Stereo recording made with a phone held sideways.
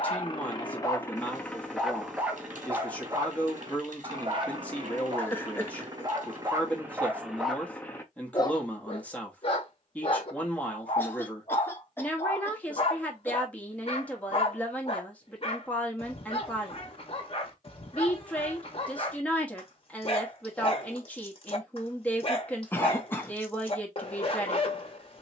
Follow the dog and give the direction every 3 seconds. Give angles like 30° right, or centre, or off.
10° left, 30° right, centre, 40° left, 40° left, 40° left, 40° left, 40° left, 40° left.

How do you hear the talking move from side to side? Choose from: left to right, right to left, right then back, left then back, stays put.
stays put.